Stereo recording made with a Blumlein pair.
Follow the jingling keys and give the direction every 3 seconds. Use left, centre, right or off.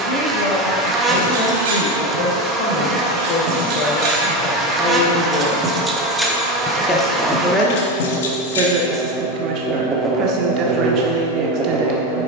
right, right, left, off.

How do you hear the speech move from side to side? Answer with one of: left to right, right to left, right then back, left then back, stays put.
left to right.